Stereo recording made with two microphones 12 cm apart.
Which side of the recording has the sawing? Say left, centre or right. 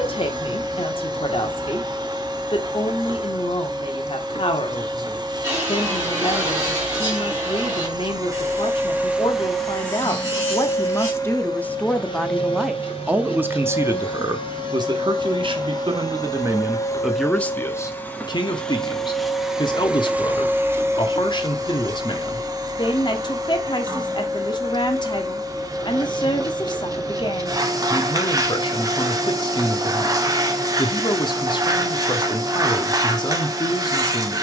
right.